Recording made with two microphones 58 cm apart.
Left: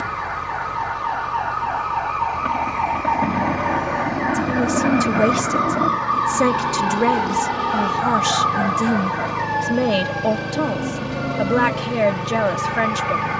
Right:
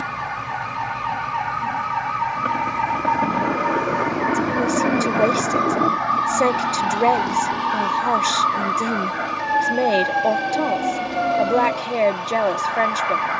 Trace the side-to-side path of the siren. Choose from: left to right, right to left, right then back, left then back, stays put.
right to left.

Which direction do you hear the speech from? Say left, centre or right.
left.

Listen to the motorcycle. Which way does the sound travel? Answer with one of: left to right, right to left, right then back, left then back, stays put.
stays put.